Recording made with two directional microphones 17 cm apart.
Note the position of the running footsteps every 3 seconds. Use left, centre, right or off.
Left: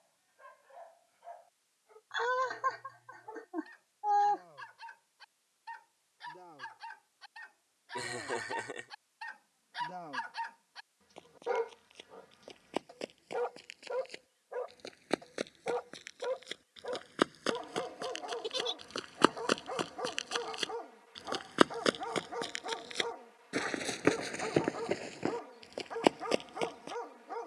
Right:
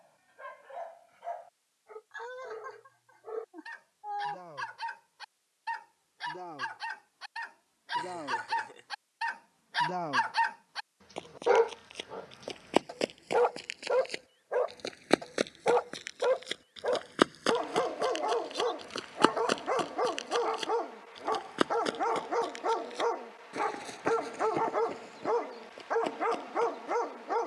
off, off, off, right, right, right, centre, left, left.